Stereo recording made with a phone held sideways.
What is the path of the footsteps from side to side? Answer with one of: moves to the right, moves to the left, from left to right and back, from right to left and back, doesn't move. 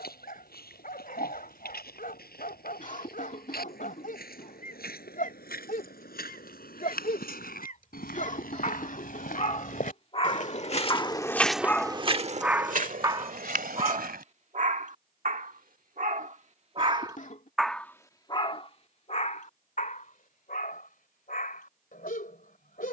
moves to the right.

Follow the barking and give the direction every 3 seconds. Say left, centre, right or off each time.
left, left, left, left, right, right, left, left.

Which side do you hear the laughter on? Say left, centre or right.
left.